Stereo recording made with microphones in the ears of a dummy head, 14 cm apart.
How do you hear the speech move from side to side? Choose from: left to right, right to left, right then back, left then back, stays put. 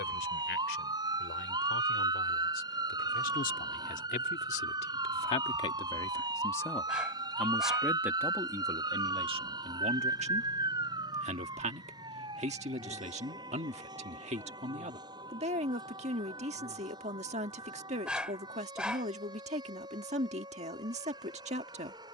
left to right.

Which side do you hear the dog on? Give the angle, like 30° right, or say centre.
10° right.